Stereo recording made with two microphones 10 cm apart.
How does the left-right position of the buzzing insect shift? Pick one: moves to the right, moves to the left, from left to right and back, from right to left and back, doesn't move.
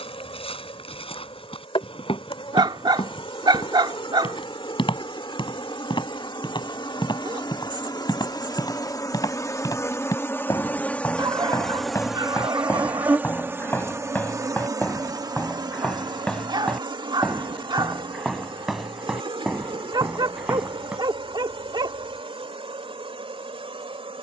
moves to the right.